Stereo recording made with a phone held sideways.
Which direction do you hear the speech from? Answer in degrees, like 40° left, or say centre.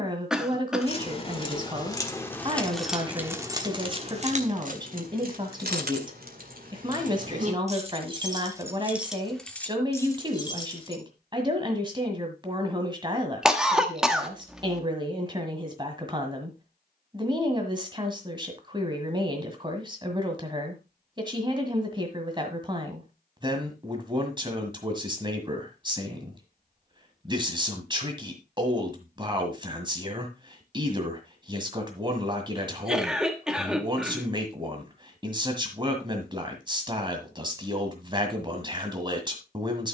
30° right.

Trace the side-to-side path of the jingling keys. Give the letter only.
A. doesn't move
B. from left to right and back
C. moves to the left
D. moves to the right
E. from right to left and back
B.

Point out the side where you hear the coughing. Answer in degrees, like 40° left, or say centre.
centre.